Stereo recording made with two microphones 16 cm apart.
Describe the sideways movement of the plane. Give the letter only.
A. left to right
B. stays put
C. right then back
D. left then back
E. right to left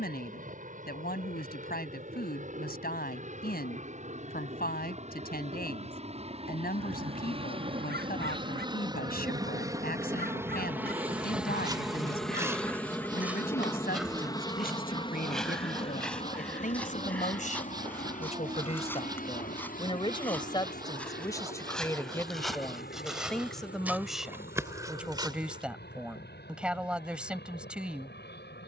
E.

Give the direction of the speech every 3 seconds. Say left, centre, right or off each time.
left, left, left, left, left, left, left, centre, centre, centre.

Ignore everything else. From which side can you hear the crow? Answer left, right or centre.
right.